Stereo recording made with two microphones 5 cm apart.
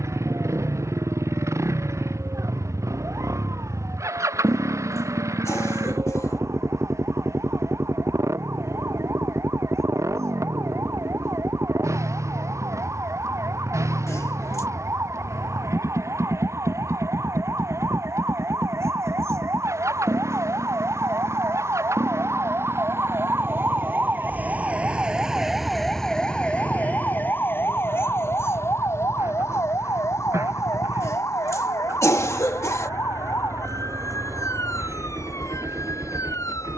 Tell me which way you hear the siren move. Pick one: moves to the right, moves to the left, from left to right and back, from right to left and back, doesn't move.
moves to the left.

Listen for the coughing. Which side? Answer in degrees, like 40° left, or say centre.
70° left.